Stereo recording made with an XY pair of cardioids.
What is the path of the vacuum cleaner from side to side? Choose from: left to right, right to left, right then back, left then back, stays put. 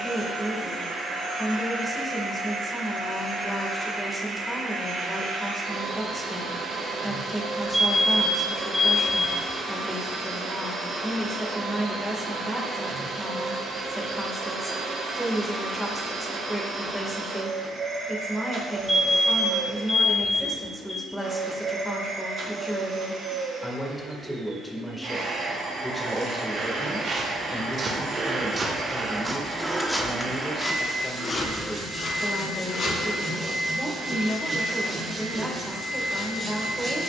stays put.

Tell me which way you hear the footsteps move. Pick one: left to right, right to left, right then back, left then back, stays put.
right to left.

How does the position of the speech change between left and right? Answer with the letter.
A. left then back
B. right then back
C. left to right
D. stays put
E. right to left
D.